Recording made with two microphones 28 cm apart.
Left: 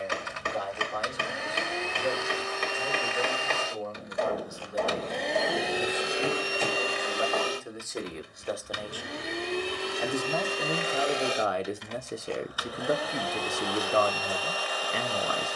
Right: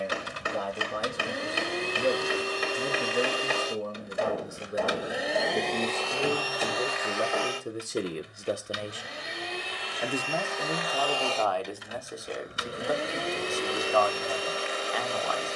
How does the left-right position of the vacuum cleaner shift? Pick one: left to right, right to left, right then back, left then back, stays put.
left then back.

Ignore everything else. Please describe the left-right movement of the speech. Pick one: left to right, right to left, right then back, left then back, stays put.
right to left.